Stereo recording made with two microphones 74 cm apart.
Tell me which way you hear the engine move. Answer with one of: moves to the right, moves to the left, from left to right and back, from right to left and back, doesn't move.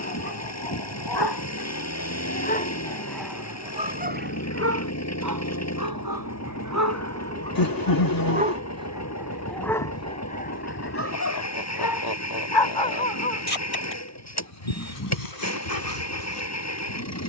doesn't move.